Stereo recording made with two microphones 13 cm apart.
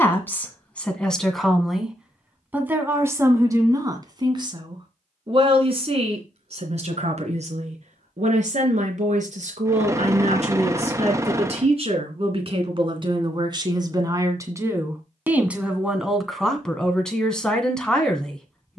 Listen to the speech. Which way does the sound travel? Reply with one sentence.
In this clip you hear the speech go right and come back.